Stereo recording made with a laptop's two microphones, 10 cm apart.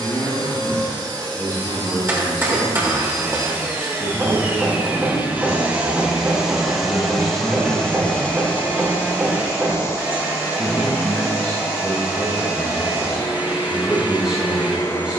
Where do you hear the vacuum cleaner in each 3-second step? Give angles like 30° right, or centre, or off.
50° right, 30° right, 10° left, 30° left, 30° left.